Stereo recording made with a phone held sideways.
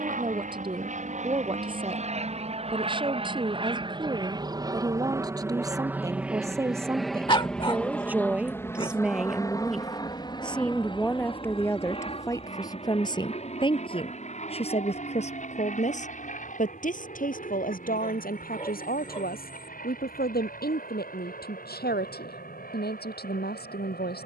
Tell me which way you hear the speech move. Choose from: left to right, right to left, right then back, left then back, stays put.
right to left.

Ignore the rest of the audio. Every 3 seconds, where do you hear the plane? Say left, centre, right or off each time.
right, right, centre, left, left, left, left, left.